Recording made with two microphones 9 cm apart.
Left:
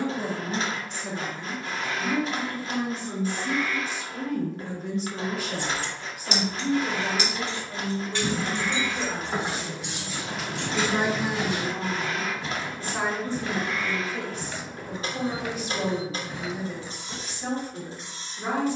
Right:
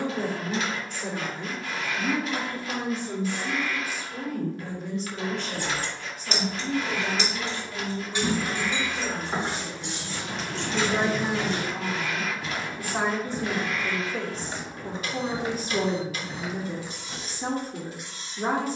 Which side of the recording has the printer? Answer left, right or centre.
left.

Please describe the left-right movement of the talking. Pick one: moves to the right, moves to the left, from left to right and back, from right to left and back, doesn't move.
from right to left and back.